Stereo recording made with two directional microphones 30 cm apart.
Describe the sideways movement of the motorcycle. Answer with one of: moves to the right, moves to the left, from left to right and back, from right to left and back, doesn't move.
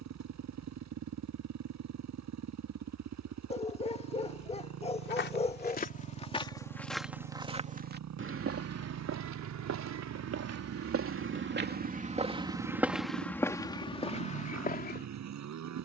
doesn't move.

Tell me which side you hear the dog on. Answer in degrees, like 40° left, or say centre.
20° left.